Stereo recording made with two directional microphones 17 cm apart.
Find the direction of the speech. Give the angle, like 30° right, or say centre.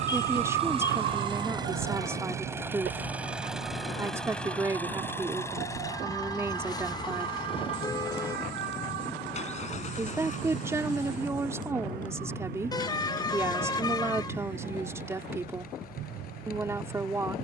20° right.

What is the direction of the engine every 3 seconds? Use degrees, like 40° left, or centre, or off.
30° right, 10° left, 30° left, 40° left, 50° left, 60° left.